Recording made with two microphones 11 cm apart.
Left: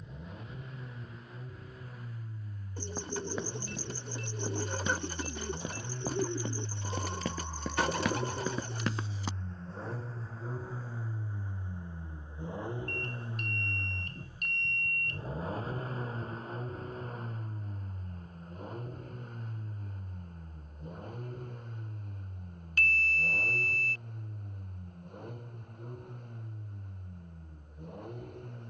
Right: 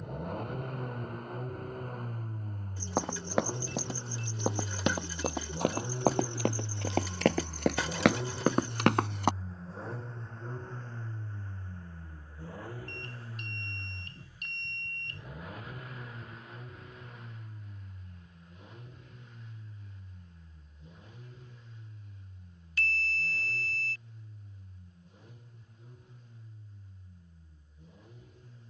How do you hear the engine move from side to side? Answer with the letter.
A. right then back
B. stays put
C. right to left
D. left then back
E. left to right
C.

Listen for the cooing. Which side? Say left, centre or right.
left.